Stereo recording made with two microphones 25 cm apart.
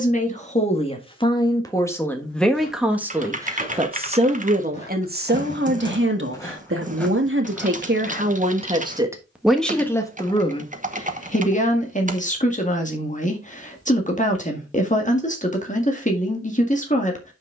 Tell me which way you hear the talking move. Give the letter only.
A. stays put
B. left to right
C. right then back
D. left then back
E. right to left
C.